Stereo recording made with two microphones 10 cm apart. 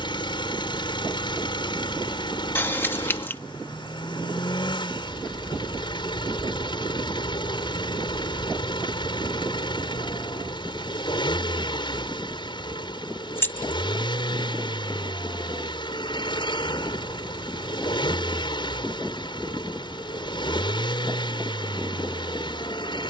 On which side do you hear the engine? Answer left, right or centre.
left.